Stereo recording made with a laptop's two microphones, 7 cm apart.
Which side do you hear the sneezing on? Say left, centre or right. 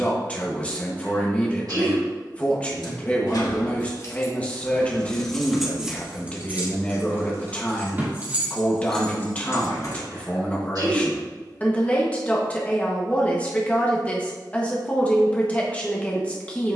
right.